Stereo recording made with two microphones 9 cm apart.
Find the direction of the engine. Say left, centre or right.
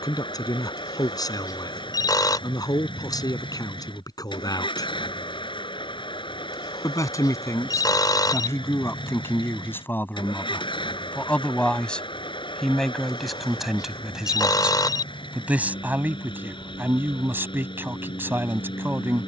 left.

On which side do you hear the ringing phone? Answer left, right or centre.
left.